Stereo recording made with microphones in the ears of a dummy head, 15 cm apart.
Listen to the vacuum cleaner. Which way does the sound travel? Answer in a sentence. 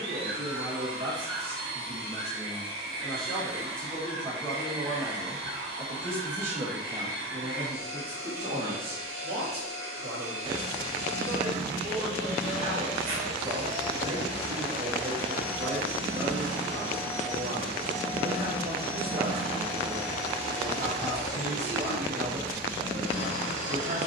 In this clip you hear the vacuum cleaner stay in one place.